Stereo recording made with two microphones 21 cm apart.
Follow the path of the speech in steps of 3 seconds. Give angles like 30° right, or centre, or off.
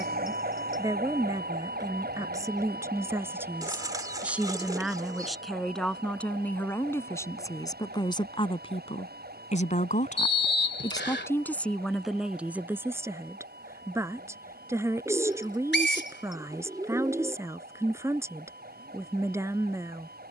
20° right, centre, 20° left, 20° left, 10° right, 10° right, 10° right.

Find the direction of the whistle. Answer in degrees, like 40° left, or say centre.
60° left.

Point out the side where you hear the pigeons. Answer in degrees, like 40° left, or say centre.
20° right.